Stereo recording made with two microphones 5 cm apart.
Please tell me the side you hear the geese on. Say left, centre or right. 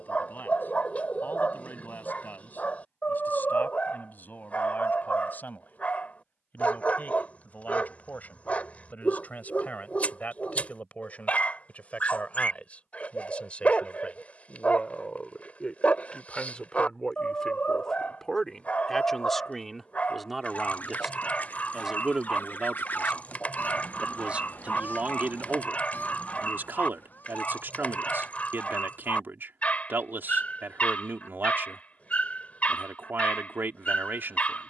left.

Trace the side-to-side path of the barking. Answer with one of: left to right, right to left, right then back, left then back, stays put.
stays put.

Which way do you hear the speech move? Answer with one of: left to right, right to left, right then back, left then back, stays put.
left to right.